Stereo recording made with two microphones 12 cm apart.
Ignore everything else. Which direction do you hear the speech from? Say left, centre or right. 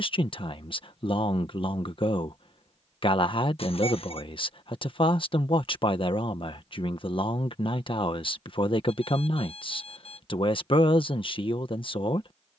left.